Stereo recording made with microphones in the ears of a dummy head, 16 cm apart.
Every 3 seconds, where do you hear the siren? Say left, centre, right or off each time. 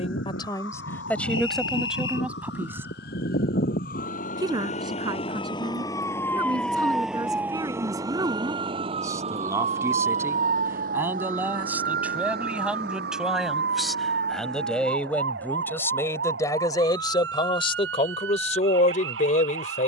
left, left, centre, right, right, right, right.